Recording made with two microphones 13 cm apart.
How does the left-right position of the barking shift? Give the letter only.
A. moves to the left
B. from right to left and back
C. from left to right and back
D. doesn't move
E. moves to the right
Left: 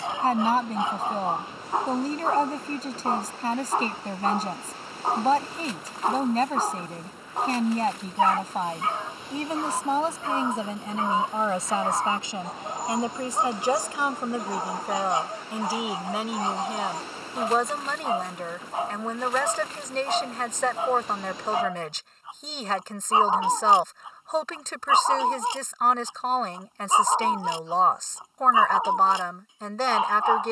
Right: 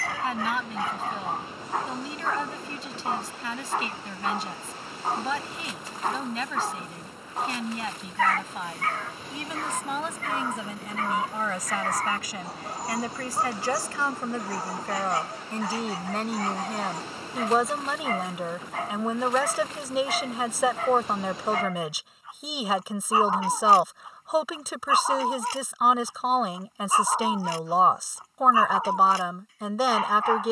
D.